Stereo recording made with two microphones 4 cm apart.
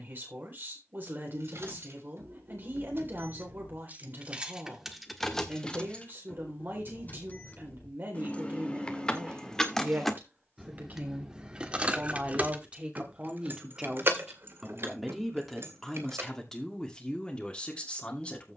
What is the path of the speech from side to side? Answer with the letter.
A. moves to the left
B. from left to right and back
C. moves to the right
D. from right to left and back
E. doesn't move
A.